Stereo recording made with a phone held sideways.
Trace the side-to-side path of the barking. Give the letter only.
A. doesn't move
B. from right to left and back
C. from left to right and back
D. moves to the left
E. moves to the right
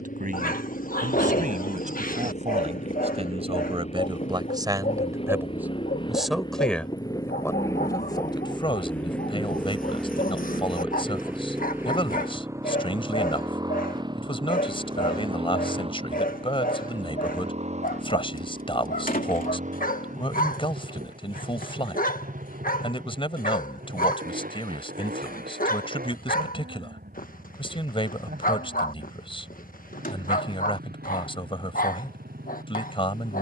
A.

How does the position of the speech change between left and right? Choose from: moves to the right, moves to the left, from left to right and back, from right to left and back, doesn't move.
moves to the left.